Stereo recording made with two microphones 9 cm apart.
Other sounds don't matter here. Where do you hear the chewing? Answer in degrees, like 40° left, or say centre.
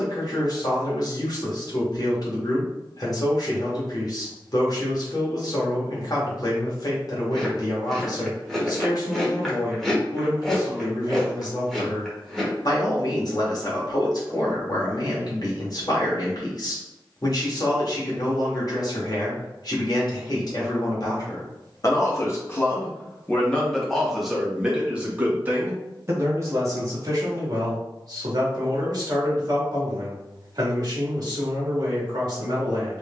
centre.